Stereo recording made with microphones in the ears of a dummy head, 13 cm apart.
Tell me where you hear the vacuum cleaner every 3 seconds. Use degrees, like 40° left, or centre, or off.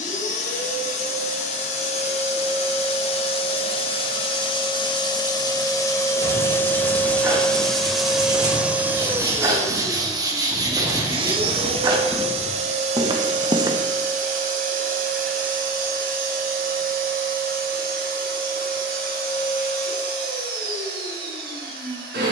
50° left, 30° left, 10° left, 30° right, 50° right, 60° right, 70° right, 70° right.